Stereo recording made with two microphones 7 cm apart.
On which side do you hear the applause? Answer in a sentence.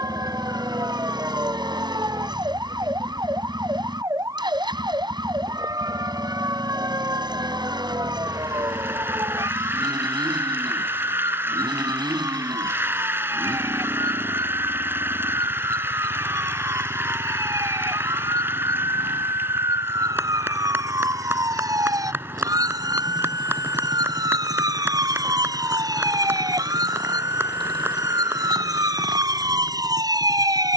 In this clip you hear the applause on the right.